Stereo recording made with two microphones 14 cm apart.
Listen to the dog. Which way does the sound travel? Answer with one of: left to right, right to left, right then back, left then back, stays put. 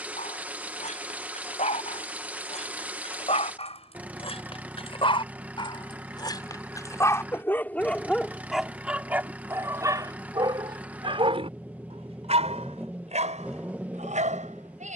left to right.